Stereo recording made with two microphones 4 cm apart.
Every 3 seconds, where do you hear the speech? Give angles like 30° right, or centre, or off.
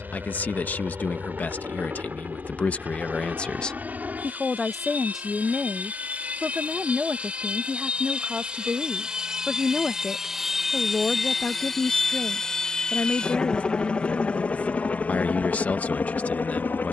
50° left, 10° left, 40° right, 20° left, 40° left, 40° left.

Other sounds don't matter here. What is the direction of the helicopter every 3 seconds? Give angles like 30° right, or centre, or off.
50° right, 50° right, 30° right, 10° right, 20° left, 50° left.